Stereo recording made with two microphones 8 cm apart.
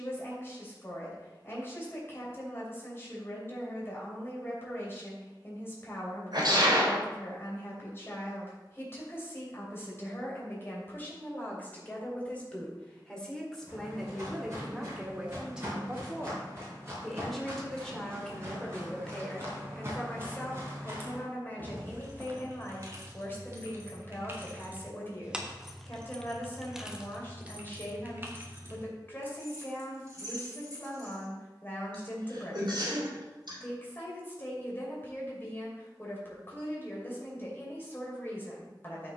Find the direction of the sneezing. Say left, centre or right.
right.